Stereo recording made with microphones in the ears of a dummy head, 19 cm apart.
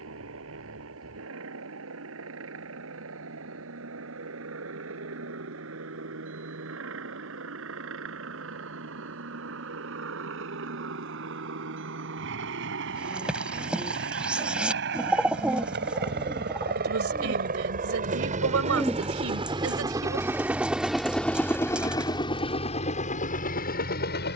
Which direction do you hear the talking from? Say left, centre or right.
right.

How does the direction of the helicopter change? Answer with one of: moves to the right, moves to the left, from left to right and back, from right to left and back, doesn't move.
moves to the left.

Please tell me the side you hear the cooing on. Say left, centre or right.
centre.